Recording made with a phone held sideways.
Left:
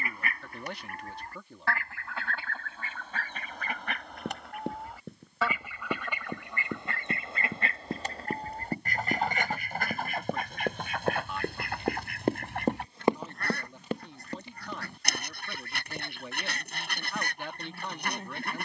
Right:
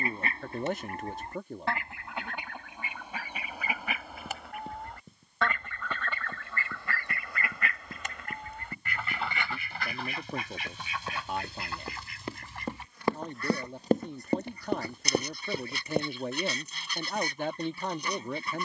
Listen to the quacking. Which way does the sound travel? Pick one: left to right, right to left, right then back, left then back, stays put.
right to left.